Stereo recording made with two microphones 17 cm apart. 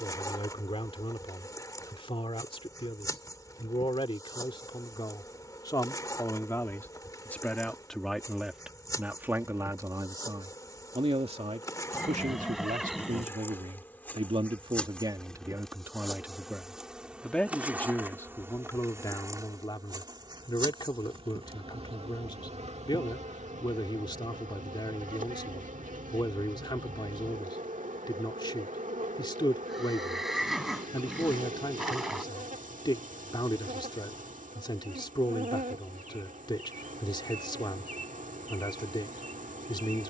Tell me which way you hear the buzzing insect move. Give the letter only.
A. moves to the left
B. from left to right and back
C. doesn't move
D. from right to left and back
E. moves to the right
E.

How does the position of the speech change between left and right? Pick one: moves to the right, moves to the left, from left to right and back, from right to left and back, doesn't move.
from left to right and back.